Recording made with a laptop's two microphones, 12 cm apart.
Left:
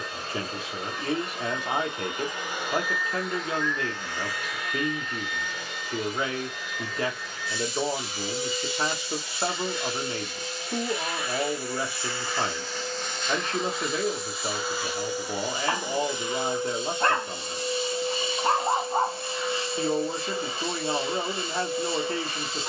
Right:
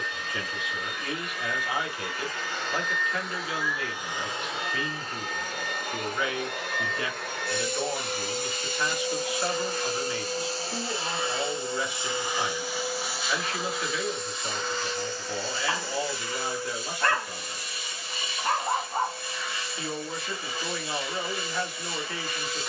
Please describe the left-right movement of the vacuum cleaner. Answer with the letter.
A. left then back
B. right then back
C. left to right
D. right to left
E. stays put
B.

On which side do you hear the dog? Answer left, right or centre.
left.